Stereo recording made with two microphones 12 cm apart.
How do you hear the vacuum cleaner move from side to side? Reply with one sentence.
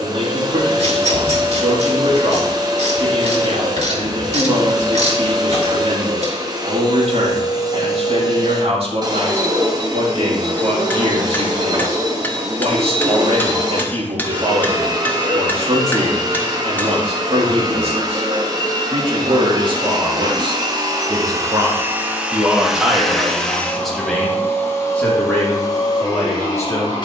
In this clip you hear the vacuum cleaner move from right to left.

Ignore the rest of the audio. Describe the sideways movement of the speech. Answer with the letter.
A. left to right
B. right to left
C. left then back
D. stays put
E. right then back
B.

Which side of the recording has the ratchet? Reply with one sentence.
In this clip you hear the ratchet on the right.